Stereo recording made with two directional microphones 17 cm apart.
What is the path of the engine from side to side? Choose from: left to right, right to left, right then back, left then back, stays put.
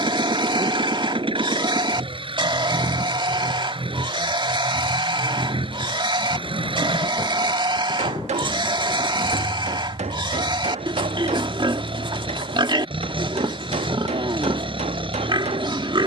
stays put.